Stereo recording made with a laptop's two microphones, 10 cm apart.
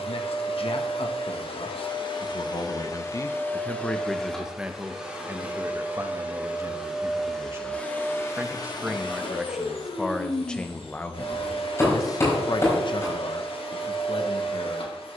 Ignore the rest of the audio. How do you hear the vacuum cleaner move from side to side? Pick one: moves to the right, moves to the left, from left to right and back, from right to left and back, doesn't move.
from left to right and back.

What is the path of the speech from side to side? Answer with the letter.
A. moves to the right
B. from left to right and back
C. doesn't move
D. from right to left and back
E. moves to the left
B.